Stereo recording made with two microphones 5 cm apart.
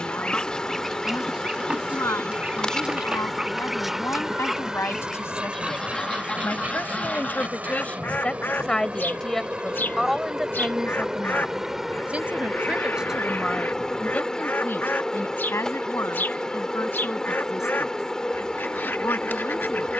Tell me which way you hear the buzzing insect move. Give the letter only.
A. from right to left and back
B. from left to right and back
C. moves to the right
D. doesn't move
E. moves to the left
B.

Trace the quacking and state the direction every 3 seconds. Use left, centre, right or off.
centre, centre, left, left, left, left, left.